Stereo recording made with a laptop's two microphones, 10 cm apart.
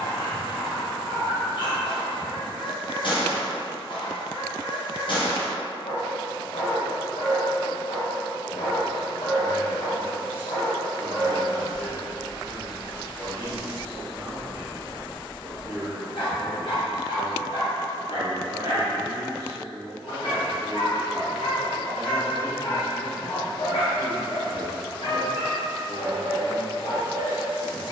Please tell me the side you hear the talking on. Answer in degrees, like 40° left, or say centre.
30° right.